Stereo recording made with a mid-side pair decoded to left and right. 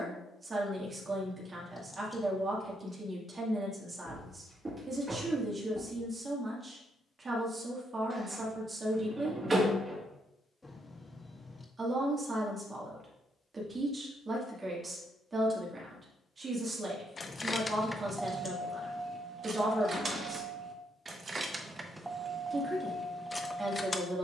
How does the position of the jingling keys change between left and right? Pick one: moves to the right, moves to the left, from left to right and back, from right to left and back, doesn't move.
from left to right and back.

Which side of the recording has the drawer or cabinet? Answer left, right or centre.
right.